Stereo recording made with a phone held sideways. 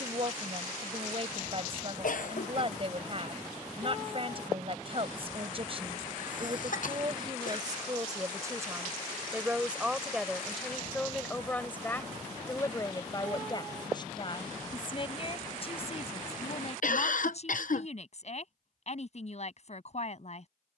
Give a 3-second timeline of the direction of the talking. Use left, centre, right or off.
right, right, right, centre, left, left, left.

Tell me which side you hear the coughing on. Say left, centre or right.
left.